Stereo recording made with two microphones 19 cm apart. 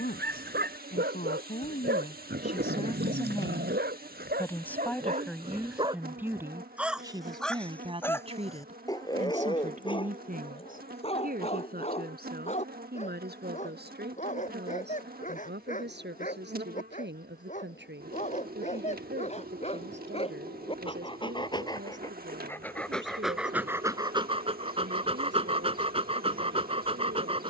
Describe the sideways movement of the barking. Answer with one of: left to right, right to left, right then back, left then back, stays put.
left then back.